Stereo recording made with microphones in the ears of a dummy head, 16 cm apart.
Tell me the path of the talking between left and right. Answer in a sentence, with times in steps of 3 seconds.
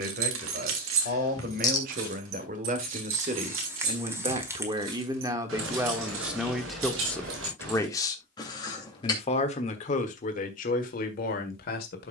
You can hear the talking on the right from 0 s, in the centre from 6 s and on the left from 9 s.